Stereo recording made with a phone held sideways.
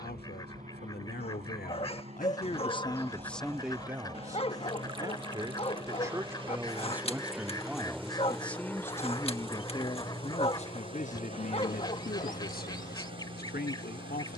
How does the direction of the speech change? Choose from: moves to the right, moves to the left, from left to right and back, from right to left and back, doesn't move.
from left to right and back.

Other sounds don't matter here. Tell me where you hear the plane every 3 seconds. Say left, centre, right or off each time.
right, right, centre, left, left.